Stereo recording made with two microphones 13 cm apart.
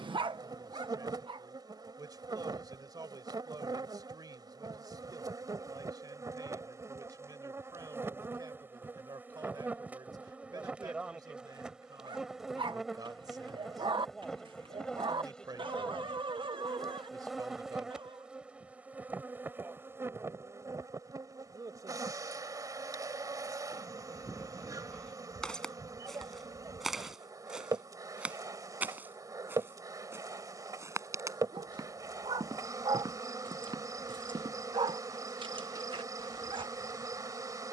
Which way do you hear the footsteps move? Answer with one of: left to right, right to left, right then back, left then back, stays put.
left to right.